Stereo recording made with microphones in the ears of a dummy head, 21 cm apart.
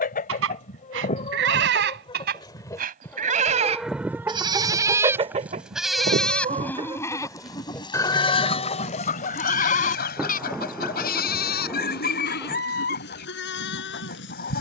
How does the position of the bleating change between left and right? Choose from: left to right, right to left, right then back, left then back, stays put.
right to left.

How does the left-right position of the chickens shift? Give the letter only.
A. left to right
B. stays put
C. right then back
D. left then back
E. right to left
C.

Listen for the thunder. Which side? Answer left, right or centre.
centre.